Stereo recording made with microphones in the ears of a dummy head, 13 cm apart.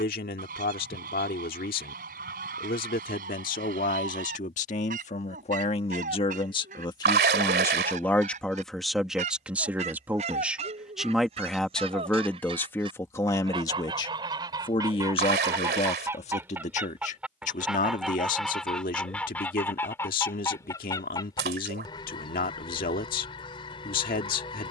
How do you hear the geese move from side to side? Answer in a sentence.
In this clip you hear the geese move to the left.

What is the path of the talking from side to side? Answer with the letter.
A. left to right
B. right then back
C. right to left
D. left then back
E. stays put
B.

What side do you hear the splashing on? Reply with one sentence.
You can hear the splashing on the right.